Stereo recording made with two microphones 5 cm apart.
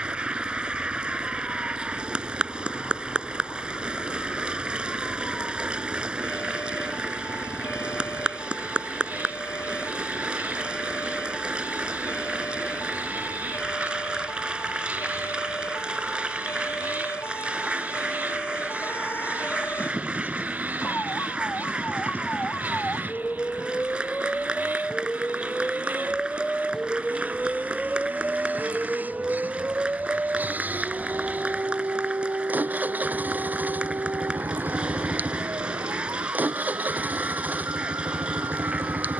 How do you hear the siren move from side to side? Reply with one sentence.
In this clip you hear the siren go from the left side to the right.